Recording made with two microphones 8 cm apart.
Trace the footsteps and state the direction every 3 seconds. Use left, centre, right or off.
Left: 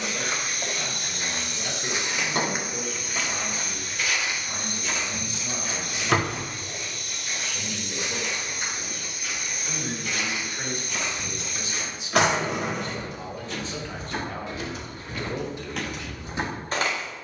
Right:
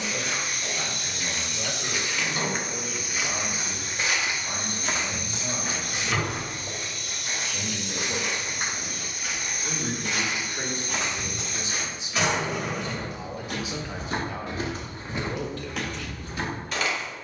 left, right, right, right, right, centre.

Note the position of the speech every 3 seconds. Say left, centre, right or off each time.
right, right, right, right, centre, left.